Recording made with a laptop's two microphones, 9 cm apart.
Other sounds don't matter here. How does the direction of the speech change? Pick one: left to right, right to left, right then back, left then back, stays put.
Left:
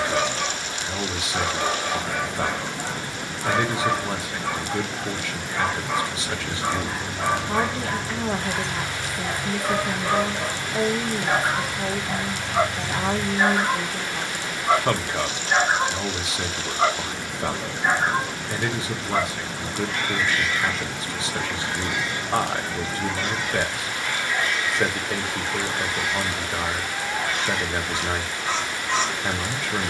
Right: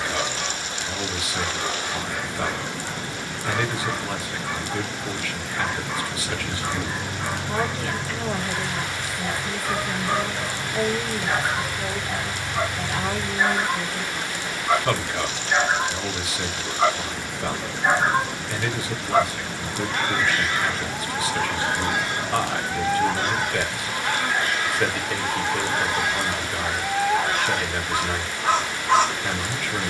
stays put.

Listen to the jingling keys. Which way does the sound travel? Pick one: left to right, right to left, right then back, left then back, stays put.
right to left.